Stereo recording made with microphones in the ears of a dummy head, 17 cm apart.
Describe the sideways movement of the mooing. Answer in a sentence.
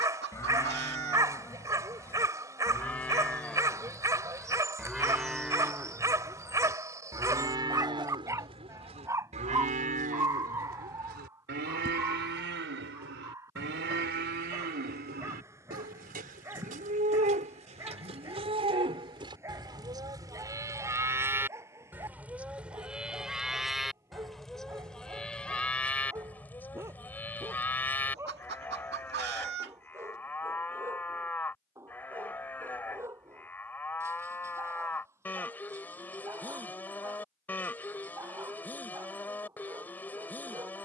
In this clip you hear the mooing go right and come back.